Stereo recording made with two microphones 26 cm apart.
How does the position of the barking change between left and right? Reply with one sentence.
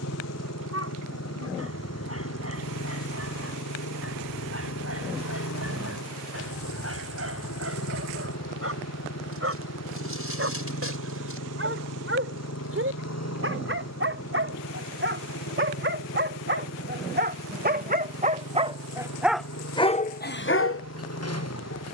You can hear the barking move to the left.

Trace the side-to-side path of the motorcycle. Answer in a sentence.
You can hear the motorcycle stay put.